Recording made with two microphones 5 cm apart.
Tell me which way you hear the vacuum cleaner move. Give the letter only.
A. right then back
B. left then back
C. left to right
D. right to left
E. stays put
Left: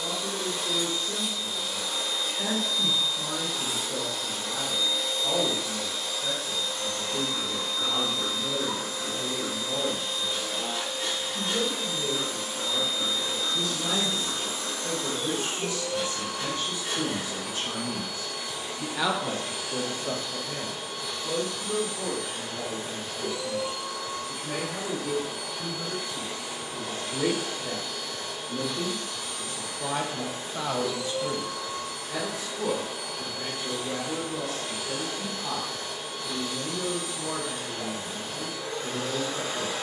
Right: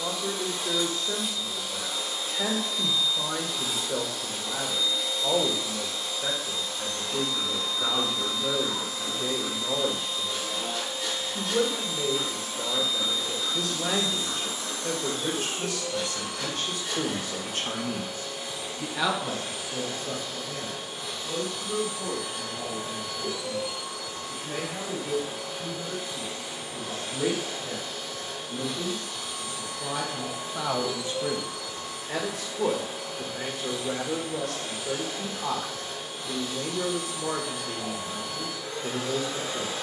E.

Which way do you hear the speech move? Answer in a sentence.
In this clip you hear the speech go left and come back.